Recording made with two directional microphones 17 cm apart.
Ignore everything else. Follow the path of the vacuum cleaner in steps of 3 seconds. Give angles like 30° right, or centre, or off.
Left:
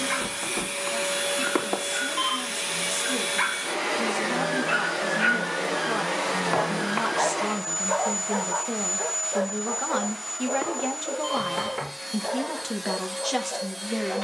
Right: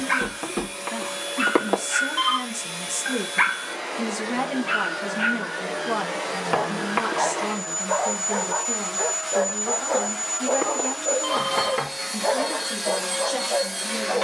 50° left, 40° left, 10° left, 30° right, 40° right.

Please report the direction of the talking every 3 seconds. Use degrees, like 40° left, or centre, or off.
50° right, 20° right, 10° left, 30° left, 50° left.